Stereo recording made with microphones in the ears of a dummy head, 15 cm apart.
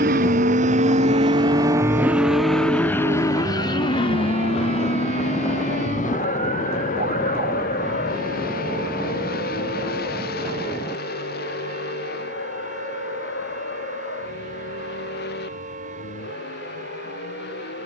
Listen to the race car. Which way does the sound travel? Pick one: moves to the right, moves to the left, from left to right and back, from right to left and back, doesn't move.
moves to the left.